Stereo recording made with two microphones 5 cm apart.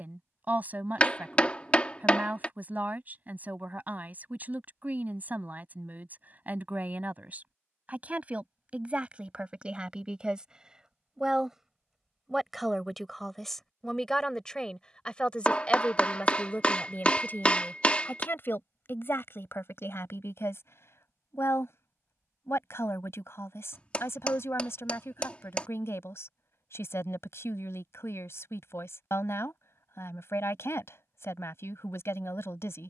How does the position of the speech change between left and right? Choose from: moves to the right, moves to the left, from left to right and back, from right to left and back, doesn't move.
moves to the left.